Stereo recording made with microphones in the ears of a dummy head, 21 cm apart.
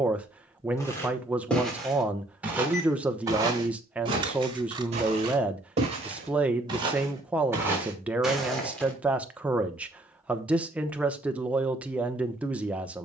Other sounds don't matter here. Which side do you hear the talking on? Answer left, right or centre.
centre.